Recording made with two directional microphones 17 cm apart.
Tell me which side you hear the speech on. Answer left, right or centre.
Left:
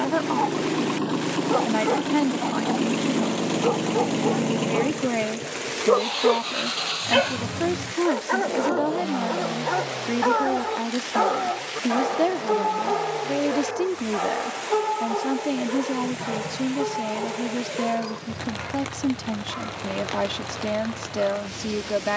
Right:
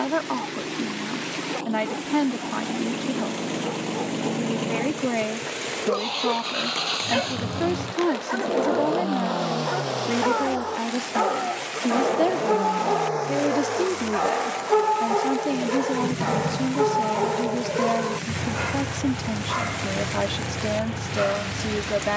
centre.